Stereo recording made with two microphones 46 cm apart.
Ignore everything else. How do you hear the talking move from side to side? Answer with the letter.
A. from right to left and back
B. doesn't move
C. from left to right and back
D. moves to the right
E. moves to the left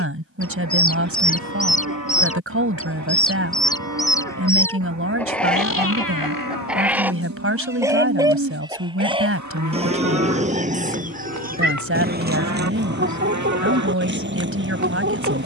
B.